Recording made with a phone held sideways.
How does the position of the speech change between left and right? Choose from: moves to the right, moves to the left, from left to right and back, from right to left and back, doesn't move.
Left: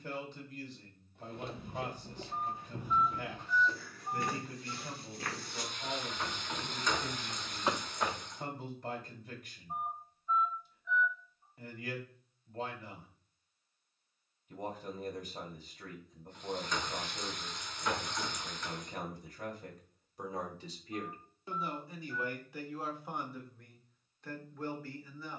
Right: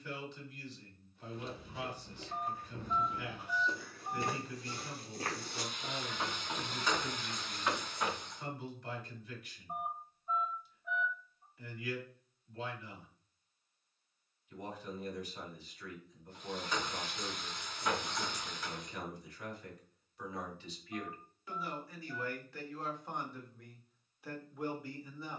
moves to the right.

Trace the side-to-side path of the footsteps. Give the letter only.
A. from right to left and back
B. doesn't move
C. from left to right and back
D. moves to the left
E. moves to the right
C.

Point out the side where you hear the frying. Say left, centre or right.
centre.